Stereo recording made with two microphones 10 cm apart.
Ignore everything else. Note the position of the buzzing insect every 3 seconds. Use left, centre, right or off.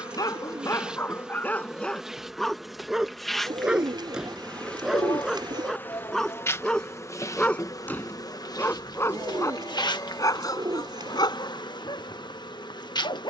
centre, centre, left, left, left.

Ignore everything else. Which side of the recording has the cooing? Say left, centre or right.
right.